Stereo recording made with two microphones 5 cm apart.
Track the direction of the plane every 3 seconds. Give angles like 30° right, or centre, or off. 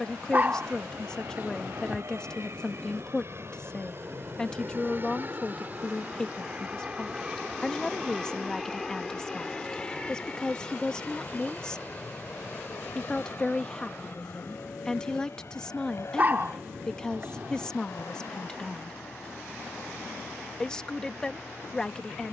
60° right, 40° right, 10° right, 20° left, 40° left, 50° left, 60° left, 60° left.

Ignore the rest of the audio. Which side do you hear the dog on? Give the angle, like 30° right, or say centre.
30° right.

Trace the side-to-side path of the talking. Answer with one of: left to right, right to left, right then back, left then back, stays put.
stays put.